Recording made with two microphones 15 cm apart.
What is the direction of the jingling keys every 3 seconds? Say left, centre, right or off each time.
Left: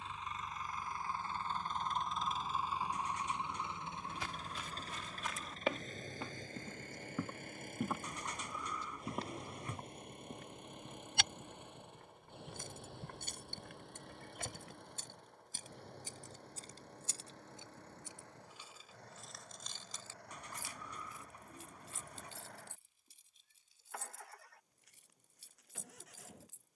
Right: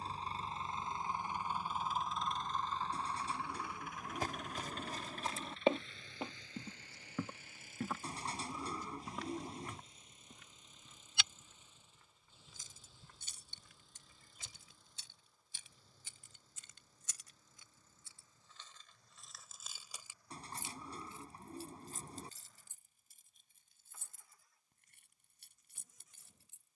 off, off, off, off, left, left, centre, right, right.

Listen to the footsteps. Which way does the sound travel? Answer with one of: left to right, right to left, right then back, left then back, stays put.
right to left.